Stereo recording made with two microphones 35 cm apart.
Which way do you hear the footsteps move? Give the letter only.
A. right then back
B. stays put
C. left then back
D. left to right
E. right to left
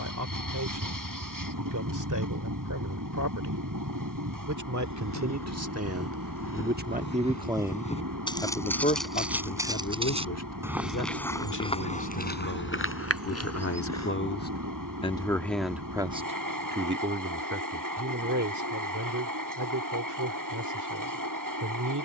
A.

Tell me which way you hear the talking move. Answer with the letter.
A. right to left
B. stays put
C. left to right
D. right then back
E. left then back
E.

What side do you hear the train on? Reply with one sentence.
You can hear the train on the right.